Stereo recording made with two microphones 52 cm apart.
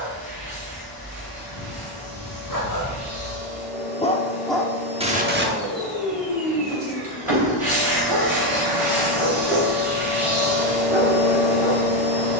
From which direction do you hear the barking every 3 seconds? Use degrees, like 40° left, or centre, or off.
50° left, centre, 60° right, 70° right.